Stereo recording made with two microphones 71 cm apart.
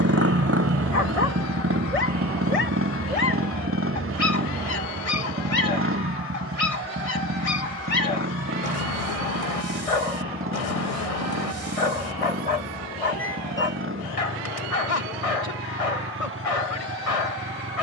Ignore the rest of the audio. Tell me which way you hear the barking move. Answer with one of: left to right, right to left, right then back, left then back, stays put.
stays put.